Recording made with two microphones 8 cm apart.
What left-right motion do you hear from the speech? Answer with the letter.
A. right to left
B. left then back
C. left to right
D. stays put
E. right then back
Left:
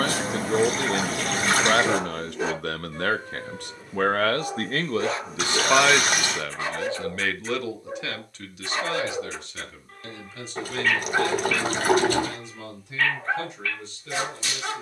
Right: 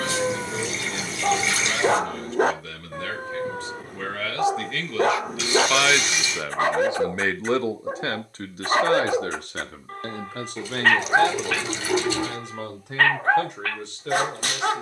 C.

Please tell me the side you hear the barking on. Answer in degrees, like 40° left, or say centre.
50° right.